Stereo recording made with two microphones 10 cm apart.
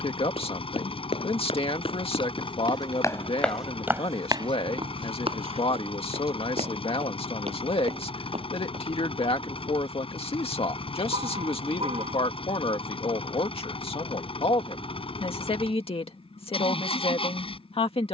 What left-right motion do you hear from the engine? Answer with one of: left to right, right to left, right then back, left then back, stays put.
stays put.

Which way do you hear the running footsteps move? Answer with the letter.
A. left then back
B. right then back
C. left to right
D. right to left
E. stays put
C.